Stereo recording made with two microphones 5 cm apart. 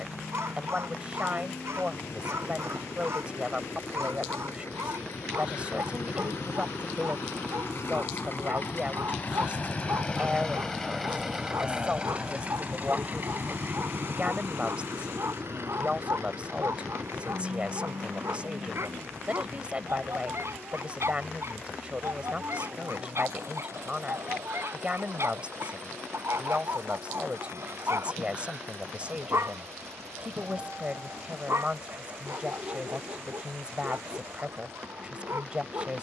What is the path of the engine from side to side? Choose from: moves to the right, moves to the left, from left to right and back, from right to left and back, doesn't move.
moves to the right.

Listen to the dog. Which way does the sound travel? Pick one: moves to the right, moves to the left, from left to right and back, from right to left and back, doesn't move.
doesn't move.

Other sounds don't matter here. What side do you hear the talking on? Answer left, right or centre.
right.